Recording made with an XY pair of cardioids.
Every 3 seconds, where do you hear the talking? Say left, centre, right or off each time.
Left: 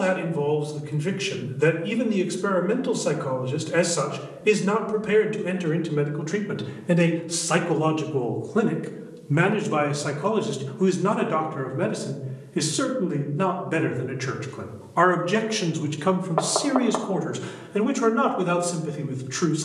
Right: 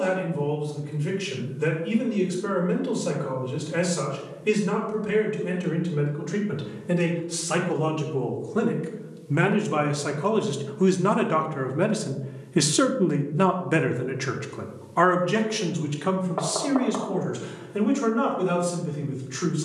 left, left, left, centre, right, left, left.